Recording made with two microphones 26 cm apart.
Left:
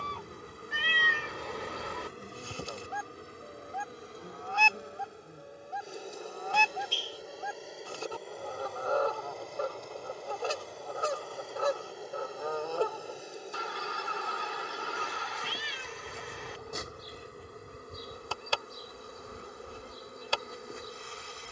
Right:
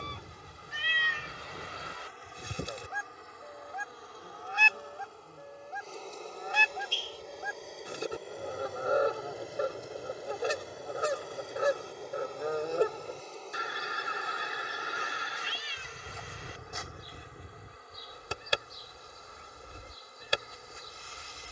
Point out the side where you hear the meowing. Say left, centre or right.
left.